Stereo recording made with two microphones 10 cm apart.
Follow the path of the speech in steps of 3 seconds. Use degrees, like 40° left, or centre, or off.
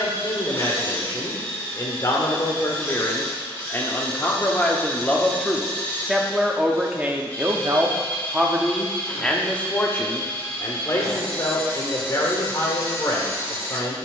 40° left, 20° left, 10° right, 30° left, 40° left.